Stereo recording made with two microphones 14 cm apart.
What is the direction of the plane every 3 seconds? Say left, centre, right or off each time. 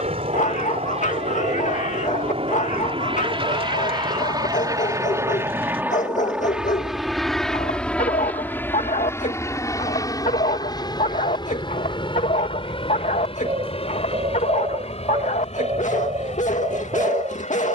right, right, centre, left, left, left.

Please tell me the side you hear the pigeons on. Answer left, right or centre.
right.